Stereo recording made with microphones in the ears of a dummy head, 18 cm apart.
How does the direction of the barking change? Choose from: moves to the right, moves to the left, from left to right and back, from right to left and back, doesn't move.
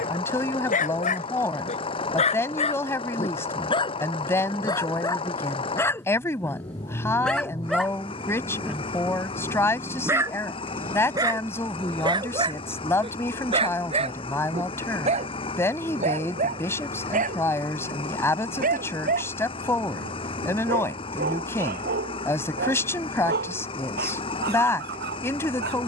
moves to the right.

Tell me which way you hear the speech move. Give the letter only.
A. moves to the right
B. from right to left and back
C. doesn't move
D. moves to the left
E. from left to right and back
C.